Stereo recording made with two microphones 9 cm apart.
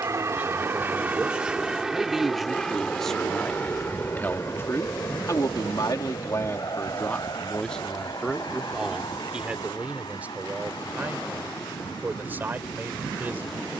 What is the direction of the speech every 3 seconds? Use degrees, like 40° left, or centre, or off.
10° right, 30° left, 10° left, 20° right, 20° right.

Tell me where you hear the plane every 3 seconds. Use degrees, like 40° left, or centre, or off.
10° right, 30° left, 40° left, 50° left, 60° left.